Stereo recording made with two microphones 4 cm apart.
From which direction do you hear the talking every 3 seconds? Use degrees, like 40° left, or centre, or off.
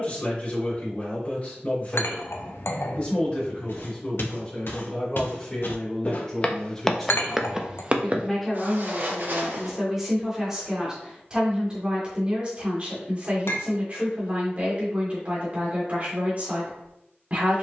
40° left, 30° left, 10° left, 10° right, 30° right, 30° right.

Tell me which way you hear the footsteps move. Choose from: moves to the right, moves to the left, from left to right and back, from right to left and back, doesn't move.
moves to the right.